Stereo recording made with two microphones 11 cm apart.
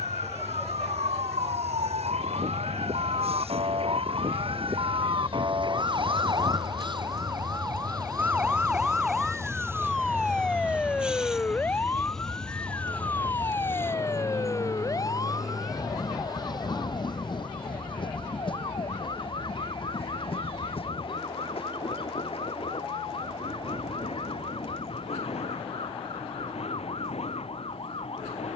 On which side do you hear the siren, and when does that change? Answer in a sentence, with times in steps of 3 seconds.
In this clip you hear the siren on the right from 0 s, in the centre from 9 s and on the left from 12 s.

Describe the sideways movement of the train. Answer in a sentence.
You can hear the train travel towards the left.